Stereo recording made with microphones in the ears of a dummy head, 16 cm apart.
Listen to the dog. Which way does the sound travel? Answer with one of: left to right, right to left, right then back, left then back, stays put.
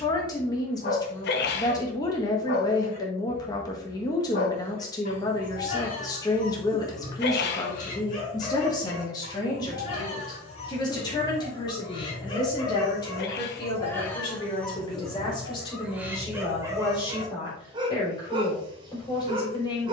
left to right.